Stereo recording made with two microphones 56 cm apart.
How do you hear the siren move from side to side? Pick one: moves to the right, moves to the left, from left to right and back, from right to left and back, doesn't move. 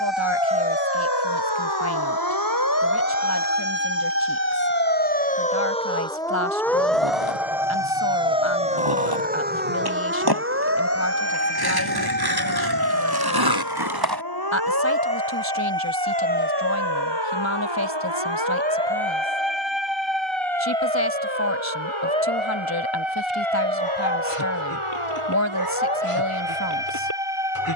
moves to the right.